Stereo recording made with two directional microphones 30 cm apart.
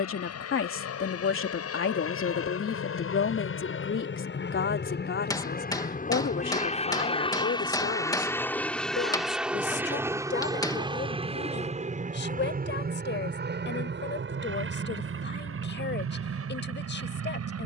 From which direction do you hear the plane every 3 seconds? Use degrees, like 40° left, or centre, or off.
60° left, 40° left, 20° left, 10° right, 30° right, 40° right.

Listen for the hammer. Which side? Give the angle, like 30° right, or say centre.
10° left.